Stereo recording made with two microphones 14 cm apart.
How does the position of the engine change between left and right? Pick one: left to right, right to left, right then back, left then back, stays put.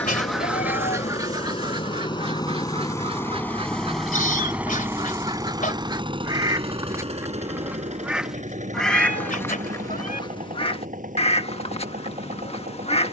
left to right.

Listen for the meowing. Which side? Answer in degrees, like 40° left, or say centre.
80° left.